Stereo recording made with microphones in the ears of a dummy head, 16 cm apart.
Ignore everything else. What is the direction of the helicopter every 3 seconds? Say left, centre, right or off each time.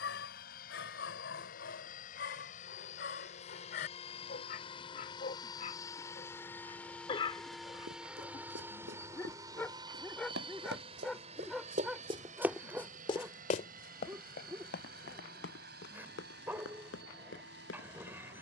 left, left, centre, right, right, right.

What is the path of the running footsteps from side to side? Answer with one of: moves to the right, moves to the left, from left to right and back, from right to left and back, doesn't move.
moves to the left.